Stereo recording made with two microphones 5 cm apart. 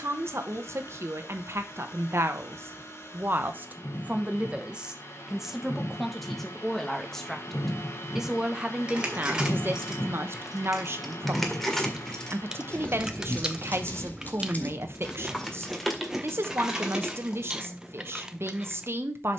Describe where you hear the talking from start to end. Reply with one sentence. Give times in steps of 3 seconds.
In this clip you hear the talking on the right from 0 s, in the centre from 6 s and on the right from 9 s.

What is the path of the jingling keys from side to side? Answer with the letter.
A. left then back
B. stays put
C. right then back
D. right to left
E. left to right
A.